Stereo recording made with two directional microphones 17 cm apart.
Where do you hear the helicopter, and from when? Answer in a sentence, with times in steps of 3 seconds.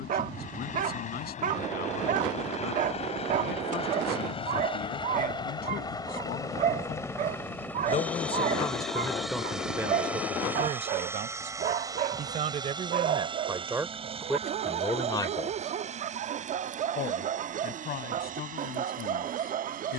You can hear the helicopter on the left from 0 s, in the centre from 6 s and on the right from 12 s.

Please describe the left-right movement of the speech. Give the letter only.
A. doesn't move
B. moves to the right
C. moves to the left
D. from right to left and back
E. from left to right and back
E.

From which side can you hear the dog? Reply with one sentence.
In this clip you hear the dog on the right.